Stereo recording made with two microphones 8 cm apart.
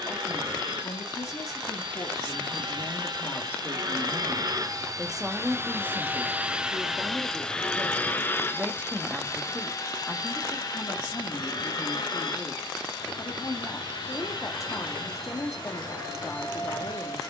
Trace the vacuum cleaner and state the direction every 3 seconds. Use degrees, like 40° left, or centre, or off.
70° right, 50° right, 10° left, 50° left, 60° left, 70° left.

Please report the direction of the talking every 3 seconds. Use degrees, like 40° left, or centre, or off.
40° left, 10° left, 30° right, 20° left, 40° left, 40° left.